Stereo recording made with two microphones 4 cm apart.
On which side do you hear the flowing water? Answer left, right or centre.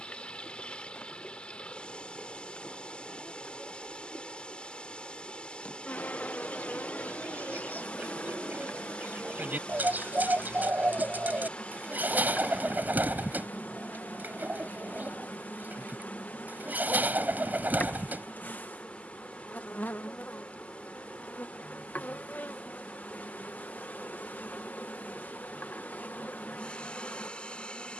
left.